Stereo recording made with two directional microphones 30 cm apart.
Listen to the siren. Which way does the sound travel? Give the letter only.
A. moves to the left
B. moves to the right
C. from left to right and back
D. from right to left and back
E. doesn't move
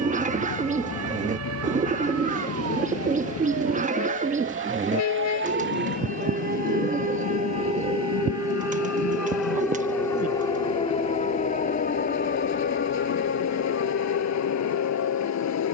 A.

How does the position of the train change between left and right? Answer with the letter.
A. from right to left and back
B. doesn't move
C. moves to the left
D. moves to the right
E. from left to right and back
B.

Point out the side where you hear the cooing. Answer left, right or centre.
right.